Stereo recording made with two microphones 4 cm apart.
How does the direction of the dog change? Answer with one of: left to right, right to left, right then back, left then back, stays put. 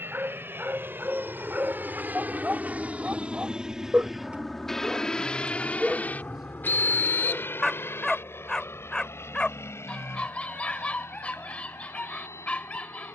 right to left.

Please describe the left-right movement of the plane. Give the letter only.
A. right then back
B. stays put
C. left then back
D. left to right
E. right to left
E.